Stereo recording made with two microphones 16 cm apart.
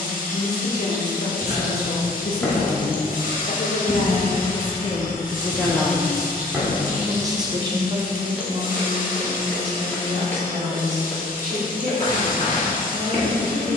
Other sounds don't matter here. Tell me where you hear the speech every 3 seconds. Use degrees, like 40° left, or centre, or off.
80° left, 40° left, 20° right, 50° right, 60° right.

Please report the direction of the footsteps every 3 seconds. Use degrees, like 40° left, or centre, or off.
20° left, 20° right, 10° right, 20° left, 40° left.